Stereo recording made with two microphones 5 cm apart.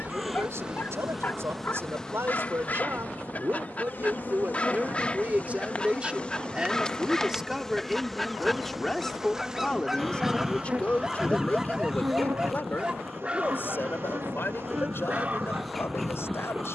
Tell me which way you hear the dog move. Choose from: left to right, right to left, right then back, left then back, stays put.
left to right.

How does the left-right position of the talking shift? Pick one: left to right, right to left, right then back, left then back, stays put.
right to left.